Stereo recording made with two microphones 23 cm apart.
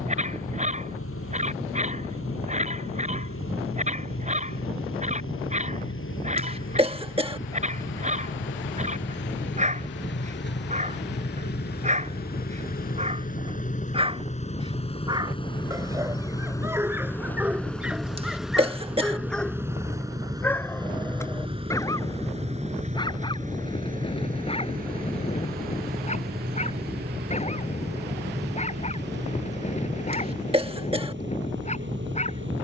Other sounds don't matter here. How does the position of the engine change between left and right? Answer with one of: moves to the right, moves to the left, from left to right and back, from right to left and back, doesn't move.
moves to the right.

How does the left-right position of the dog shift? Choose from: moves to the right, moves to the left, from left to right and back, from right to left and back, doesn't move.
moves to the left.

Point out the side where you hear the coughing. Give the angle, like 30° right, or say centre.
20° right.